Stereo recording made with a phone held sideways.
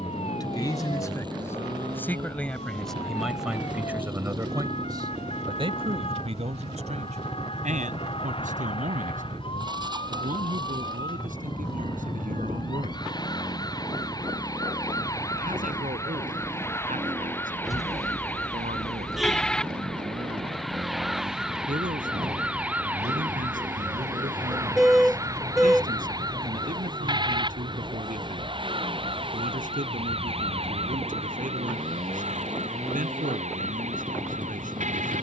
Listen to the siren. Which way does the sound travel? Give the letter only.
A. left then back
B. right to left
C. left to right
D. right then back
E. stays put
C.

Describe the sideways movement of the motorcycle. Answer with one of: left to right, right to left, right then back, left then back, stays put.
stays put.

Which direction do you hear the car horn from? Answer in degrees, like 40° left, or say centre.
centre.